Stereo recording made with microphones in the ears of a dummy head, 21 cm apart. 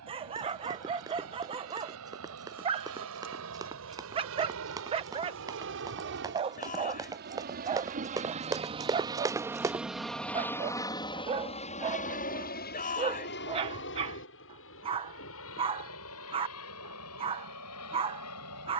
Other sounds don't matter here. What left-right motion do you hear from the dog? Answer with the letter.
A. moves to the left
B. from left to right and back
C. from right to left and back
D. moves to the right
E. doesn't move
E.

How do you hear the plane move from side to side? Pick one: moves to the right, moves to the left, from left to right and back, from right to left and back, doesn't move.
moves to the left.